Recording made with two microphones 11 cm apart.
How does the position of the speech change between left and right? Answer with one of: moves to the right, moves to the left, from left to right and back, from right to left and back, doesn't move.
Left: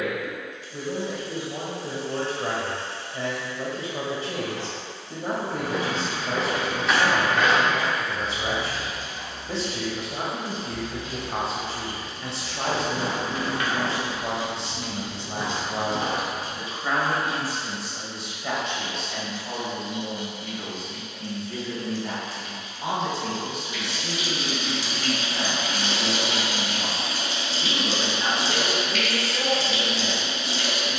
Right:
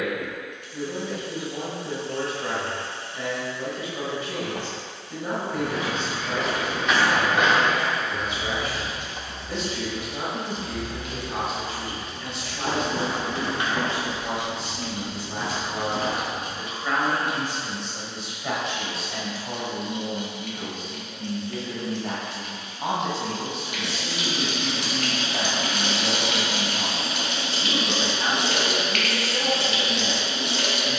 moves to the right.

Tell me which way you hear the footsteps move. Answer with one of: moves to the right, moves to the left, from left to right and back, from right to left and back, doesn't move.
from left to right and back.